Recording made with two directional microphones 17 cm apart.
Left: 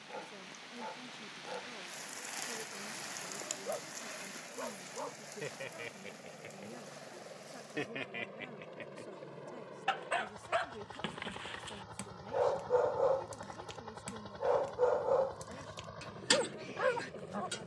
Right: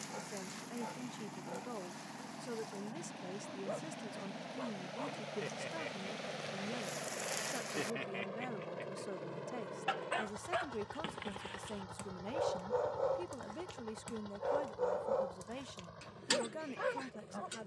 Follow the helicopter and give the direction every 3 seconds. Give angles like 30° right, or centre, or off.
50° right, 50° right, 30° right, 10° right, 20° left, 40° left.